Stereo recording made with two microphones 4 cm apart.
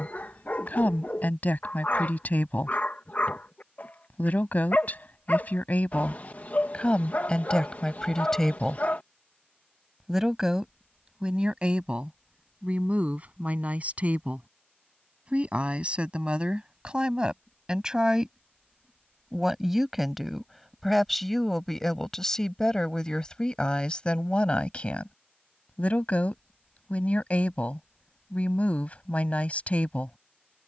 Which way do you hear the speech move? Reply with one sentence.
In this clip you hear the speech go right and come back.